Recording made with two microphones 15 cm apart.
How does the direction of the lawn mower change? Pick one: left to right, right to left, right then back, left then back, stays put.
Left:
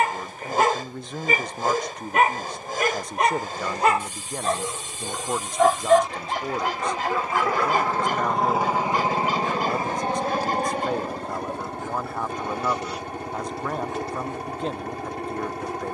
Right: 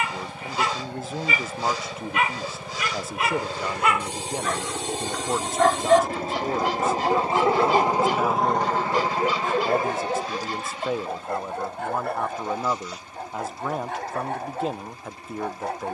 right to left.